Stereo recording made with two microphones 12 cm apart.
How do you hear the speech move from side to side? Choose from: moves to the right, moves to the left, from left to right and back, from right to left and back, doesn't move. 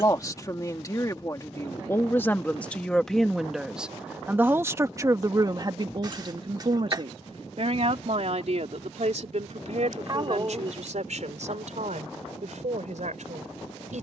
moves to the right.